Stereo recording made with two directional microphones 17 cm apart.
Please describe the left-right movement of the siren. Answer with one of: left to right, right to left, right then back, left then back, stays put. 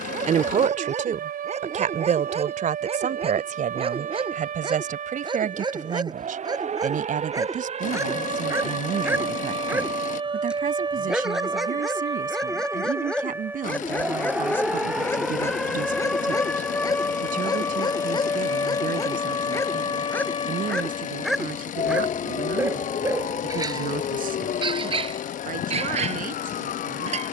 right to left.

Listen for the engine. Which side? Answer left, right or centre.
left.